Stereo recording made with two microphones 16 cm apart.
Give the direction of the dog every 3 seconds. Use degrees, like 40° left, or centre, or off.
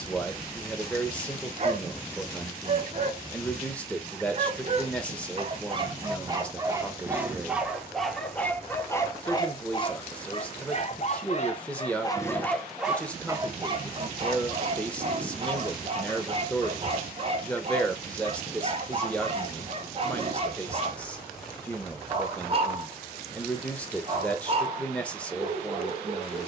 40° right, 40° right, 10° right, 30° left, 20° right, 40° right, 40° right, 40° right, 40° right.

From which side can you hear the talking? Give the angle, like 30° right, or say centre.
10° left.